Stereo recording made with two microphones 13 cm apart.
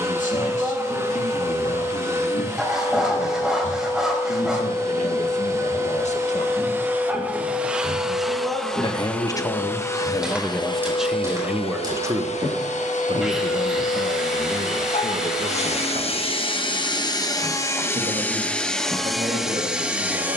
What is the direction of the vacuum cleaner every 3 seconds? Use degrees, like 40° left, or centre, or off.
20° right, 20° right, 10° right, 30° left, 60° left, 40° left, centre.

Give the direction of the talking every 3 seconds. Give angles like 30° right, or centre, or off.
70° left, 60° left, 50° left, 10° left, 40° right, 60° right, 70° right.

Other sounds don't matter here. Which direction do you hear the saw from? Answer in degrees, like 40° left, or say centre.
centre.